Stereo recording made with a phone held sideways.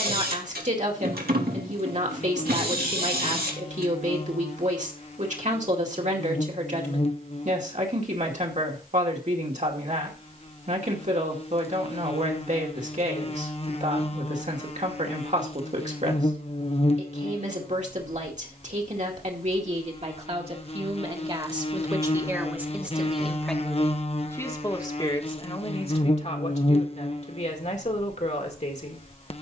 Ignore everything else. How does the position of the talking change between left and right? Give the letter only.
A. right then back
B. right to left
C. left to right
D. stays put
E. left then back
B.